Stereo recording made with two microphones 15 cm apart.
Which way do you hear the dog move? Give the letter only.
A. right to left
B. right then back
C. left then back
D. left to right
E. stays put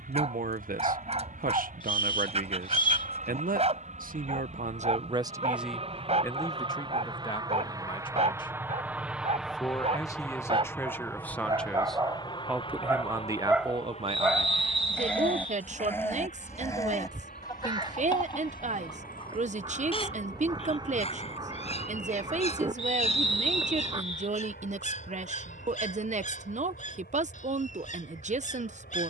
A.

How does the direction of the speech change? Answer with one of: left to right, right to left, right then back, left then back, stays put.
left then back.